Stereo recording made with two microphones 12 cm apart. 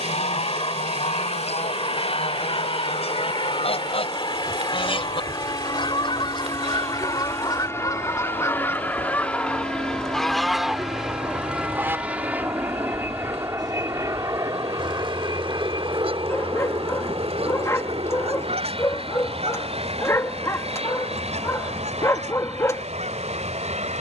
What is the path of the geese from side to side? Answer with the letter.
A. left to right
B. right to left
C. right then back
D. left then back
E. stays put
A.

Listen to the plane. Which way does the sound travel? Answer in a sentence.
You can hear the plane move from left to right.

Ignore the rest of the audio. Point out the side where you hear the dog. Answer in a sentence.
You can hear the dog on the left.